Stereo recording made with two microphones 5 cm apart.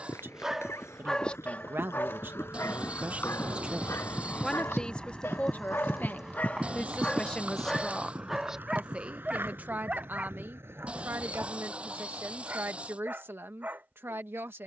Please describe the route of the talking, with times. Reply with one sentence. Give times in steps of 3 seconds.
In this clip you hear the talking on the right from 0 s, in the centre from 3 s and on the right from 9 s.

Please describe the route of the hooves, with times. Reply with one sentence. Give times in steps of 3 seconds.
In this clip you hear the hooves on the left from 0 s, on the right from 6 s and not at all from 12 s.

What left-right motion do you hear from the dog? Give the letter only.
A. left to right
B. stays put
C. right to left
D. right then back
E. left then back
E.